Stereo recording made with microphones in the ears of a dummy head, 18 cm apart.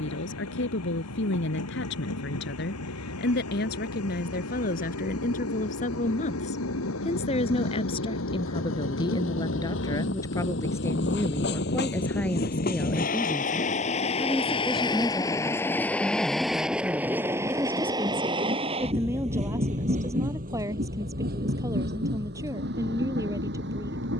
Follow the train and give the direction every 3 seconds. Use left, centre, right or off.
left, left, left, left, left, centre, right, right.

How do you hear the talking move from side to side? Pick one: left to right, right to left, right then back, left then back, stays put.
left to right.